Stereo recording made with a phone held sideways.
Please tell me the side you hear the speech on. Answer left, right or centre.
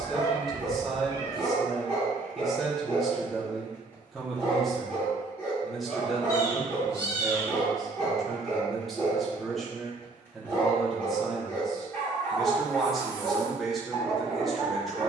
centre.